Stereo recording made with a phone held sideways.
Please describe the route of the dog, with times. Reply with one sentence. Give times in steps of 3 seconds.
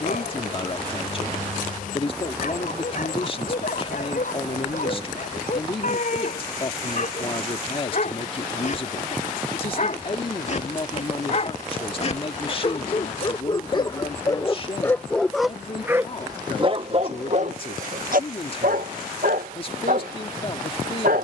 In this clip you hear the dog on the left from 0 s and on the right from 15 s.